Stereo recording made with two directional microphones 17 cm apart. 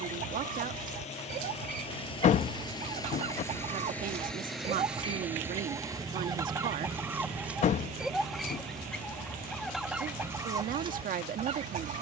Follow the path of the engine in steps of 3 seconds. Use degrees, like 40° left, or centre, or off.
40° left, centre, 40° right, 60° right.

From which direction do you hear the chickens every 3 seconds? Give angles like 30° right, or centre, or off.
50° right, 30° right, 10° right, 20° right.